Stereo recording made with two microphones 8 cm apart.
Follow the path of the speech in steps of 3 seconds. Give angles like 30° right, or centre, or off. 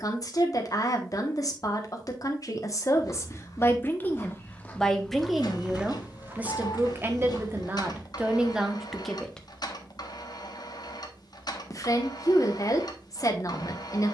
50° left, 10° left, 20° right, 20° left, 40° left.